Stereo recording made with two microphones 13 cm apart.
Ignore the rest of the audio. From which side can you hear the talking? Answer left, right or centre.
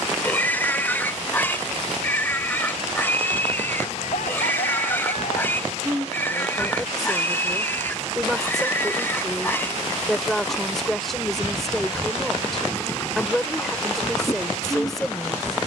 centre.